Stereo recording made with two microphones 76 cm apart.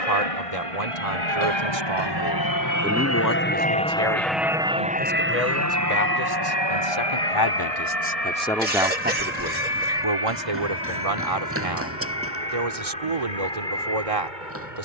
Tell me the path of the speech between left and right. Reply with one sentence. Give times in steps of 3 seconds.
In this clip you hear the speech on the right from 0 s, on the left from 3 s and on the right from 9 s.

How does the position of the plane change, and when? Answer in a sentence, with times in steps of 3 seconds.
You can hear the plane on the left from 0 s, in the centre from 3 s and on the right from 6 s.